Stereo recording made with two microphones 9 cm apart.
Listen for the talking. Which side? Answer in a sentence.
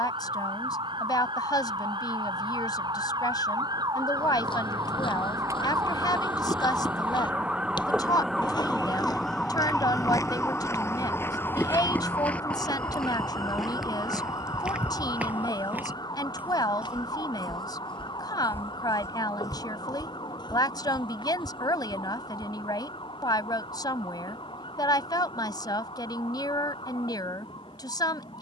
In this clip you hear the talking on the left.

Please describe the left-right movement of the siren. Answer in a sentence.
In this clip you hear the siren travel towards the left.